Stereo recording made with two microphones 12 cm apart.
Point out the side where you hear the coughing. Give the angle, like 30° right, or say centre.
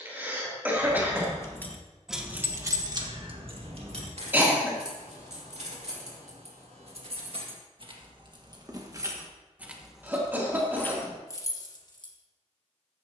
20° right.